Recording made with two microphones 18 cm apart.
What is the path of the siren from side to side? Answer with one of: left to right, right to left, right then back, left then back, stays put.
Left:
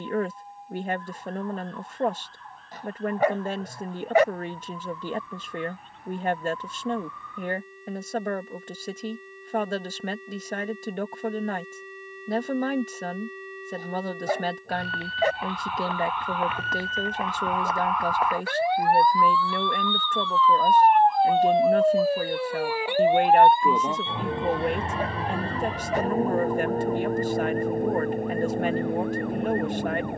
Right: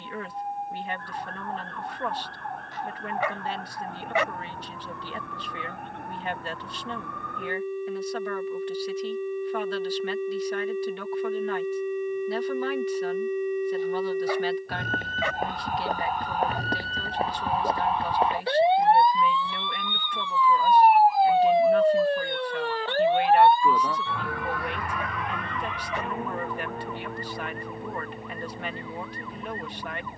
right to left.